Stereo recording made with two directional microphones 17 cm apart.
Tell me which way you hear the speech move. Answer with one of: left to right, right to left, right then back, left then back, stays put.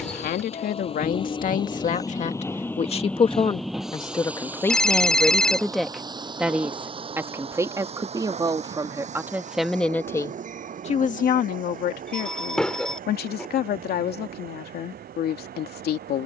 right then back.